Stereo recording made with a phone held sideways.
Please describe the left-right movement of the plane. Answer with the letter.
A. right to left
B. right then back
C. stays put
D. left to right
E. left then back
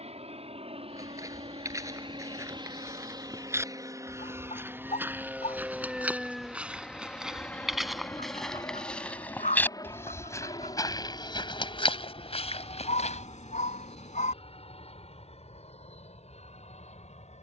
A.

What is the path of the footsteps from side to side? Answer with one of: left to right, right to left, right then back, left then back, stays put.
right to left.